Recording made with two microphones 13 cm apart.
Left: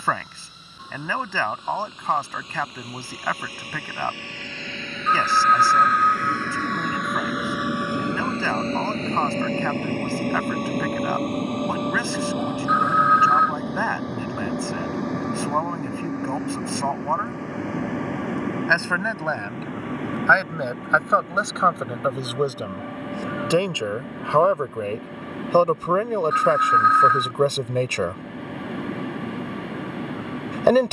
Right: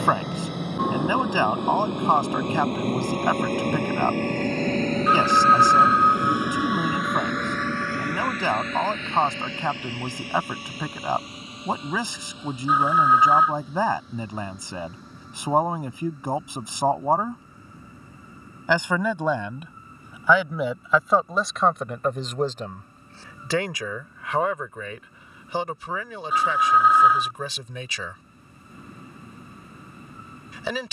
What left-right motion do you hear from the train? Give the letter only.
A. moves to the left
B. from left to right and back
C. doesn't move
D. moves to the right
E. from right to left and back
A.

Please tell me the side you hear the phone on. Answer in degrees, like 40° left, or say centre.
10° right.